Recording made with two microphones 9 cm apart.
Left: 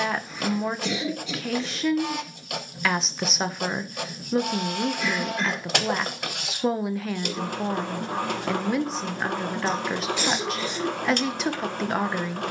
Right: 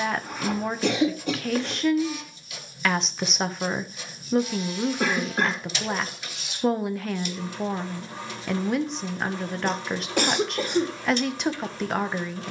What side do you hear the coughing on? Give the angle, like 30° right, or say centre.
50° right.